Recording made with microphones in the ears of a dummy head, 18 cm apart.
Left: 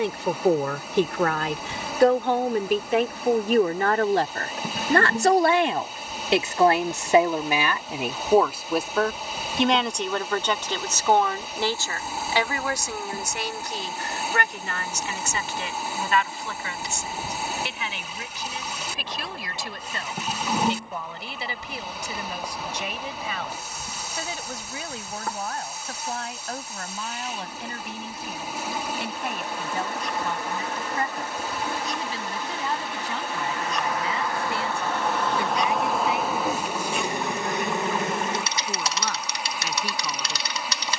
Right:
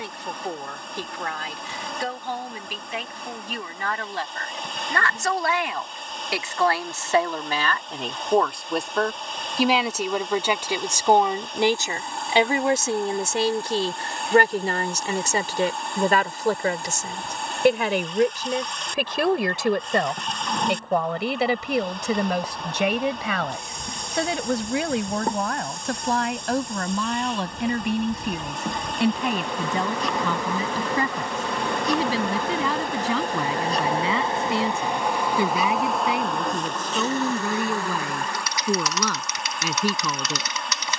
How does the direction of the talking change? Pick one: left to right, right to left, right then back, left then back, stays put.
left to right.